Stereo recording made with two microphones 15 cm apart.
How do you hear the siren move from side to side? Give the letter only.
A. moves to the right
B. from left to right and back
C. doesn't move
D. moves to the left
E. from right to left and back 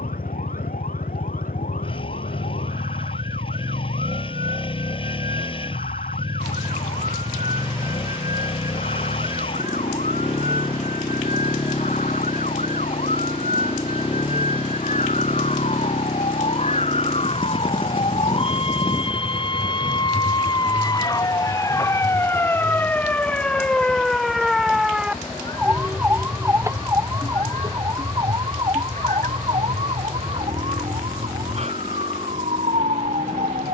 A.